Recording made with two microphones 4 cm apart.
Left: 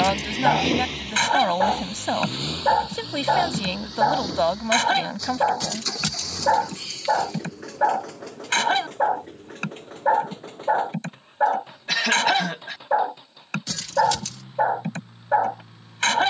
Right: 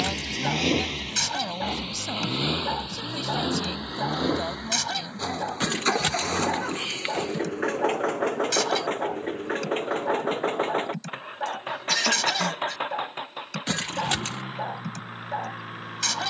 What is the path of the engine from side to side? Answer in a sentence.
In this clip you hear the engine go from the left side to the right.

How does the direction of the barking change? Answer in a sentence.
In this clip you hear the barking stay in one place.